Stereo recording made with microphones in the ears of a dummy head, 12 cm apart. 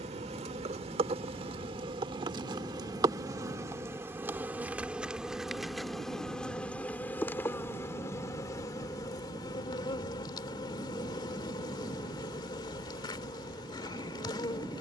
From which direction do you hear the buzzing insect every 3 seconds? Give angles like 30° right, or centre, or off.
40° right, 10° right, 20° left, 30° left, 30° left.